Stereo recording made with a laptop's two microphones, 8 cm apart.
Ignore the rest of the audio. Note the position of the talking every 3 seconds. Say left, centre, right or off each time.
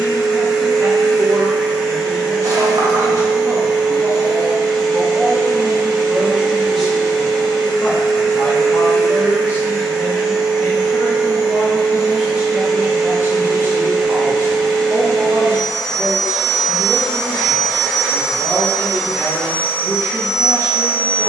right, right, centre, left, right, right, right.